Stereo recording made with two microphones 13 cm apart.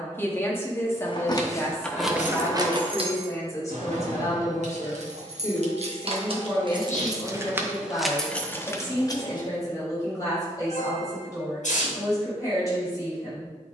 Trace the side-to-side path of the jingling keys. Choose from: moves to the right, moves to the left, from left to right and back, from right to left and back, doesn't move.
from left to right and back.